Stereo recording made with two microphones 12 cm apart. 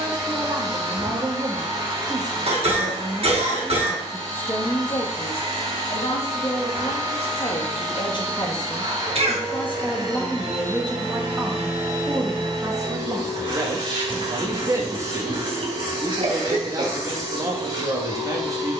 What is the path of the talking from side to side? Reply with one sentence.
In this clip you hear the talking move from right to left and back again.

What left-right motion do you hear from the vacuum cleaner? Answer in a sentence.
You can hear the vacuum cleaner stay put.